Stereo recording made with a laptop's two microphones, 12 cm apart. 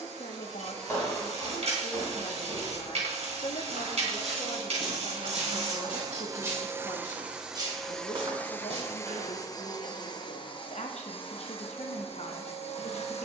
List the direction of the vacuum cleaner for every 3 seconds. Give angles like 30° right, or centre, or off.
70° right, 50° right, 10° right, 40° left, 60° left.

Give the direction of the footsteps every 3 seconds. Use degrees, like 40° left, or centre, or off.
10° left, centre, 40° right, 60° right, off.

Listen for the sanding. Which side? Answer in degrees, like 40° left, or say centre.
60° right.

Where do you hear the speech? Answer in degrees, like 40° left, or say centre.
70° left.